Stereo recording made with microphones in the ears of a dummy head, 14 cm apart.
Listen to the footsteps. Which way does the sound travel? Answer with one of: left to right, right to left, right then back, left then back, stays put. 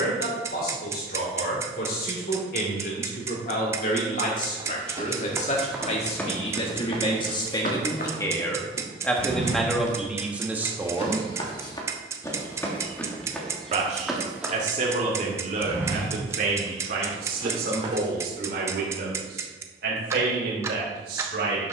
left then back.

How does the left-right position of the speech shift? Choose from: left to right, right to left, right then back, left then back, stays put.
left to right.